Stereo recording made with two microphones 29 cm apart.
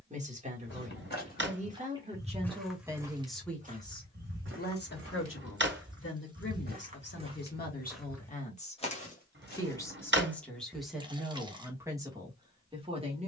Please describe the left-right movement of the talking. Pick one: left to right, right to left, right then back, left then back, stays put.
left then back.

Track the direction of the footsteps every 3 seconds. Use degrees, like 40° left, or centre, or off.
20° left, 40° right, 10° right, 30° left, off.